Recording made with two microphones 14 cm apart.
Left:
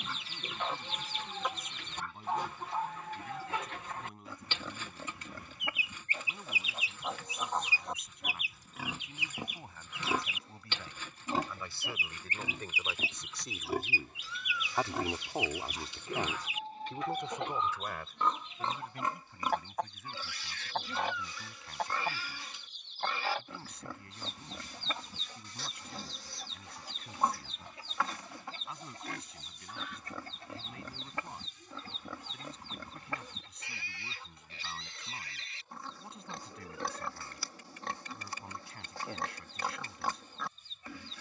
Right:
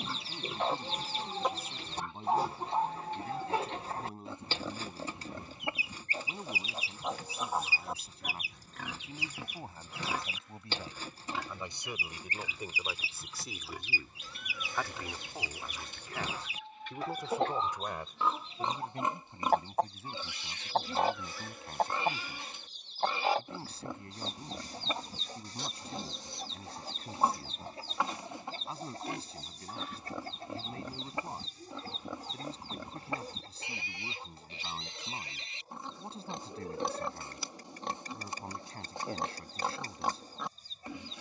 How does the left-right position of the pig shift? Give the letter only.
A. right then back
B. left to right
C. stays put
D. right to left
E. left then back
E.